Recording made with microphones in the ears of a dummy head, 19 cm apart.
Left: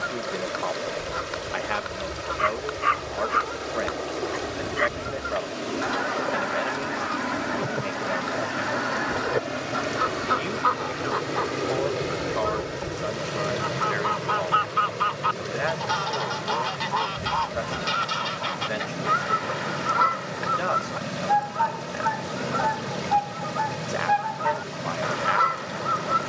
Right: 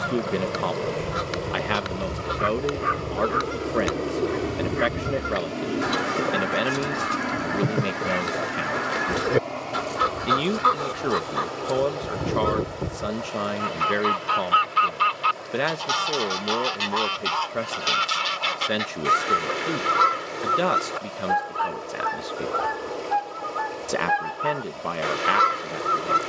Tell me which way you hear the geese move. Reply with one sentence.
You can hear the geese stay put.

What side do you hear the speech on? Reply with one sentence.
You can hear the speech on the right.